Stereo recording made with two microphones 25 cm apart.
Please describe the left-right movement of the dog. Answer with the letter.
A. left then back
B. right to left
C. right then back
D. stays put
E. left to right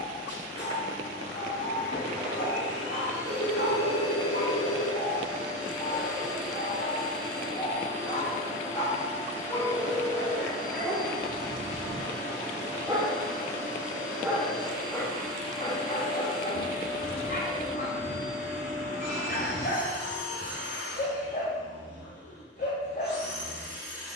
C.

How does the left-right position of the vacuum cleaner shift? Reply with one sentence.
You can hear the vacuum cleaner stay in one place.